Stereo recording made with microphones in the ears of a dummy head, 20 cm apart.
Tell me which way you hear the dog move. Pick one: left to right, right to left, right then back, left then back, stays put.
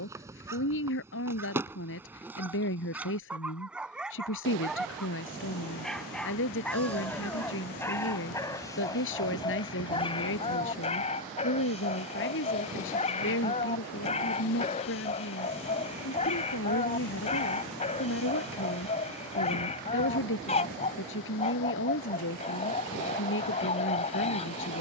right to left.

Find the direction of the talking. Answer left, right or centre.
left.